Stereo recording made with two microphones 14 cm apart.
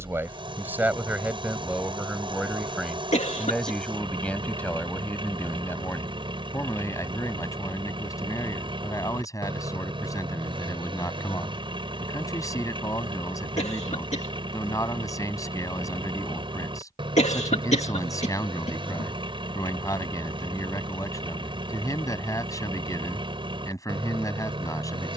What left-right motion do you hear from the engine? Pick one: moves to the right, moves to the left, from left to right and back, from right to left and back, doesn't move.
doesn't move.